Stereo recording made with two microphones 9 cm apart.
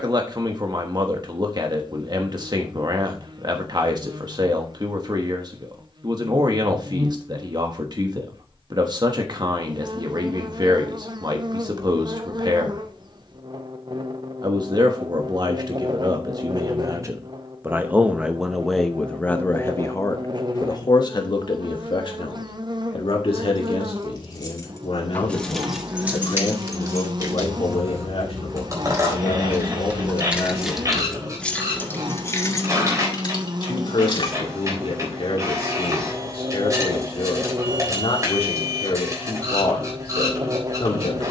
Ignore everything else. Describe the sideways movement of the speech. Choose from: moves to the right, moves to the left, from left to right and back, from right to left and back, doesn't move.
moves to the left.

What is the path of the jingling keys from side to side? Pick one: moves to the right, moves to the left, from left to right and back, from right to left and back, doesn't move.
from left to right and back.